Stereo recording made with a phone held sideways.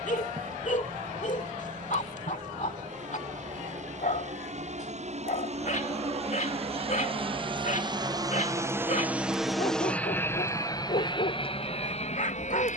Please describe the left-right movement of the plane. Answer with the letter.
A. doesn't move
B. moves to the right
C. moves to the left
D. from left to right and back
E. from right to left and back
C.